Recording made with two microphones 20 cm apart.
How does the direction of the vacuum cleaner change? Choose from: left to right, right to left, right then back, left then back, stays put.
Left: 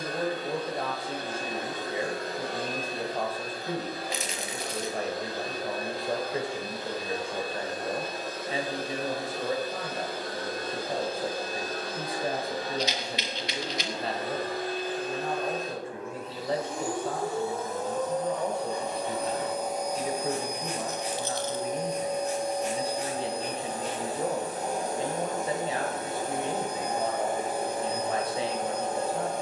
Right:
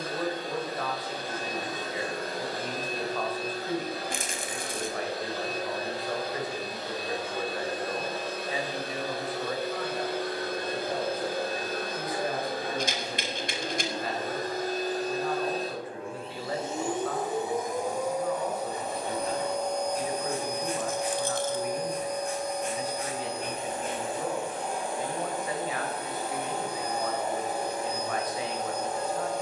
right to left.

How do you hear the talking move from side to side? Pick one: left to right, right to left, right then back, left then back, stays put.
stays put.